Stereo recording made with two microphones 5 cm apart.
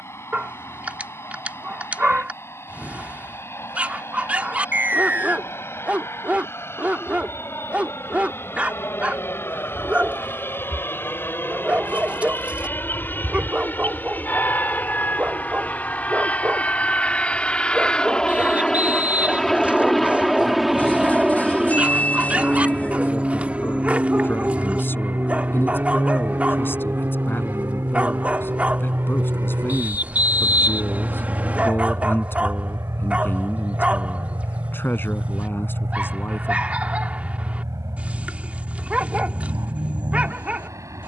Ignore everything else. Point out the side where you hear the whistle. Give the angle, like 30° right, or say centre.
30° right.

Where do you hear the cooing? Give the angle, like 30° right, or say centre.
30° left.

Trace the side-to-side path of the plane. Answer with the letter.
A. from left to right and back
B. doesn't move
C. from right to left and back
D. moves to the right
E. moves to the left
D.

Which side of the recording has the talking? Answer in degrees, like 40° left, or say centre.
50° left.